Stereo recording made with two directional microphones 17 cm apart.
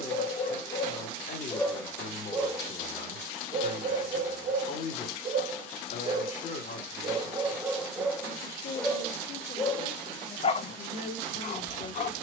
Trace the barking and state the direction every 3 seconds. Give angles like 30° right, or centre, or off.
30° left, 40° right, 10° right, 40° left.